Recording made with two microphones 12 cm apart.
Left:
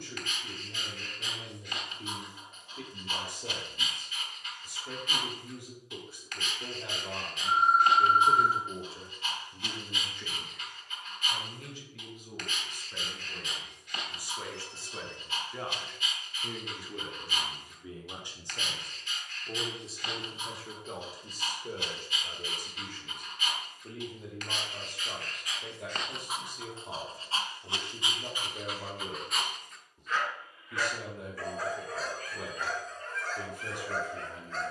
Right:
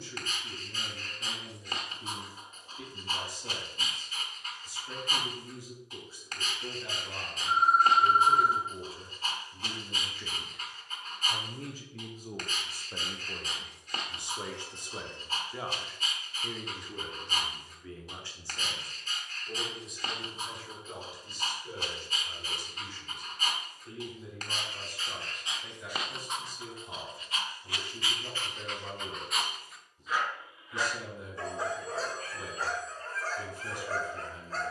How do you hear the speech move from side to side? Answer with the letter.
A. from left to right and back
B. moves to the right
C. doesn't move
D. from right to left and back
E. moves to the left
A.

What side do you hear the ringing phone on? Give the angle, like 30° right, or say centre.
40° left.